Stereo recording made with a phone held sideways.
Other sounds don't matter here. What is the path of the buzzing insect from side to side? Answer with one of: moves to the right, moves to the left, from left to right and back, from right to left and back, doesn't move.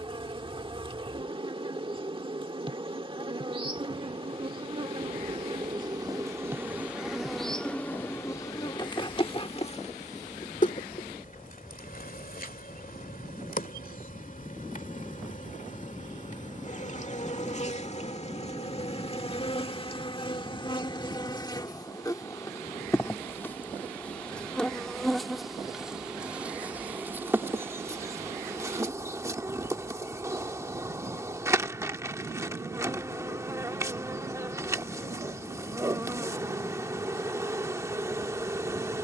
from right to left and back.